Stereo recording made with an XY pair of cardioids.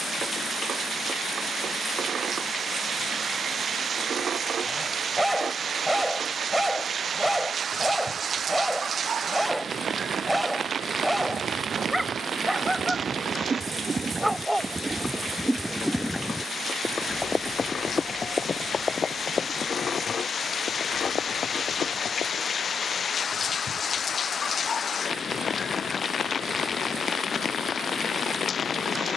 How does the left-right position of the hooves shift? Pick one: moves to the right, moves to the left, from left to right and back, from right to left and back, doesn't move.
moves to the left.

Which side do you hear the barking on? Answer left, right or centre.
centre.